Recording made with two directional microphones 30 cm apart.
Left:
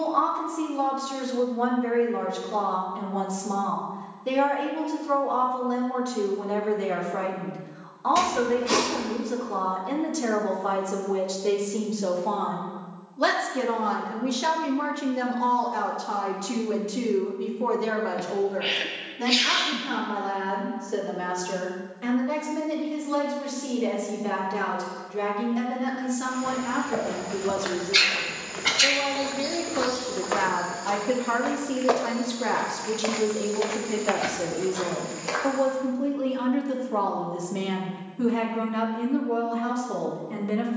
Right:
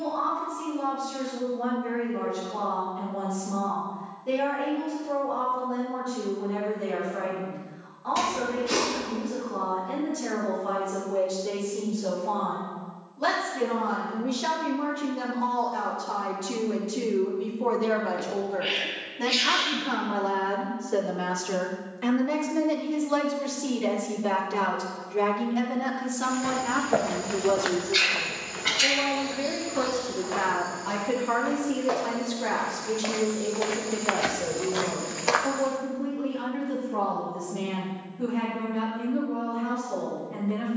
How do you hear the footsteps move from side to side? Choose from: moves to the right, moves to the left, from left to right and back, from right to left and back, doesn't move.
from right to left and back.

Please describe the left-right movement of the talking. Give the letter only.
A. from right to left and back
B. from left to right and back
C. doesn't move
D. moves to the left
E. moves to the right
B.